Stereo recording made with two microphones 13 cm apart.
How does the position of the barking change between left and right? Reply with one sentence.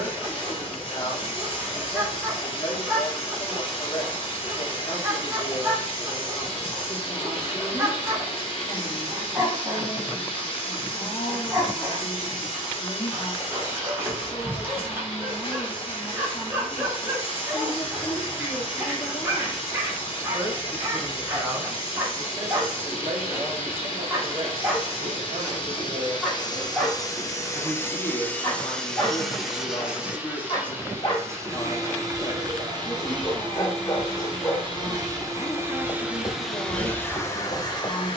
In this clip you hear the barking travel towards the left.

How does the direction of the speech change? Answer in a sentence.
You can hear the speech move from left to right and back again.